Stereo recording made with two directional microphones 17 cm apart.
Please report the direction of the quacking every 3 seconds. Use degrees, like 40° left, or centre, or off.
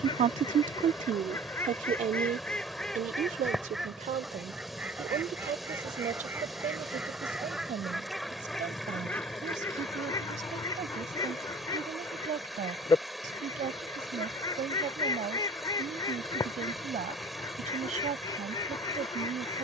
20° left, 10° right, centre, 20° left, 20° left, 20° left, 20° left.